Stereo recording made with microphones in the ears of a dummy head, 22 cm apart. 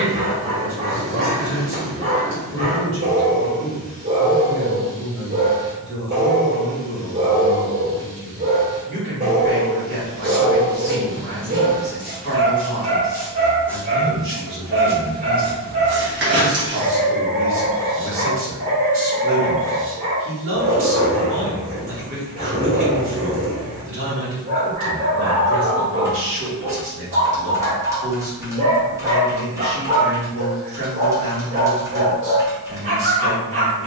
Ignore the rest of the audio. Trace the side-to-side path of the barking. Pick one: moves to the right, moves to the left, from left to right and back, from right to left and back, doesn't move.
doesn't move.